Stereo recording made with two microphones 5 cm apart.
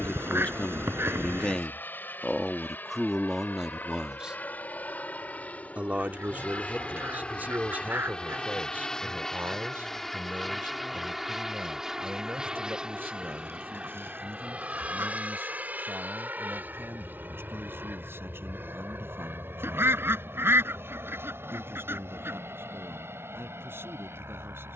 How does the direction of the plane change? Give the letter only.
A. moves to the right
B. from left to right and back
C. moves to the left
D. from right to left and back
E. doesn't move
A.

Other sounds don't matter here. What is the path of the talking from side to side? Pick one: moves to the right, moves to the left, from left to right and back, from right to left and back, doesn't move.
moves to the right.